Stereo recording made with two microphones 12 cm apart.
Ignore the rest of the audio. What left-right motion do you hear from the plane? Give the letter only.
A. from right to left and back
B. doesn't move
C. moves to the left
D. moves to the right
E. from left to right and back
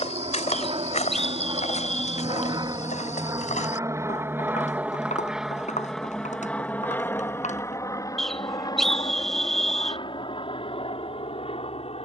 C.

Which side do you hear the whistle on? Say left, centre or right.
centre.